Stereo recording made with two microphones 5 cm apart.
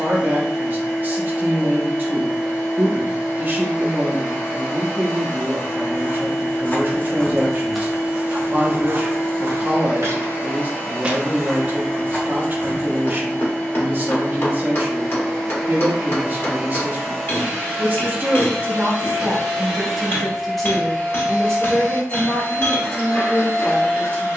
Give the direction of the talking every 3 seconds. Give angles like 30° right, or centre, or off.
40° right, 40° right, 40° right, 40° right, 40° right, 40° right, 20° right, 20° left.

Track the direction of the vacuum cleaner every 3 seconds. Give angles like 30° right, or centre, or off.
70° left, 70° left, 70° left, 50° left, 30° left, centre, 10° right, 40° left.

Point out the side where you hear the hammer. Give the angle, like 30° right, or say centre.
50° left.